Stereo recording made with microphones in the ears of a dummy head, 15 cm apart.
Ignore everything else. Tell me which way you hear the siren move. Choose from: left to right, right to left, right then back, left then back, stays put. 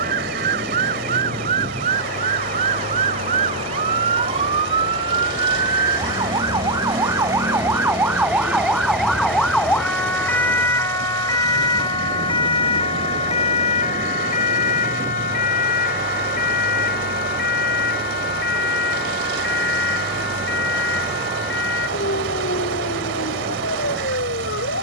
right to left.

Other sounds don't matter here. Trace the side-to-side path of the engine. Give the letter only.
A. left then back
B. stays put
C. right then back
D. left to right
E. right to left
B.